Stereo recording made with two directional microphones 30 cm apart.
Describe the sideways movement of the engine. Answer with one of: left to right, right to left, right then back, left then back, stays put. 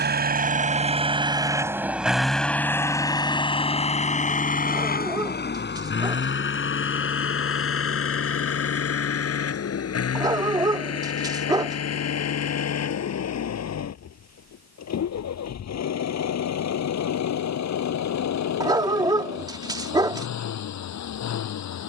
right to left.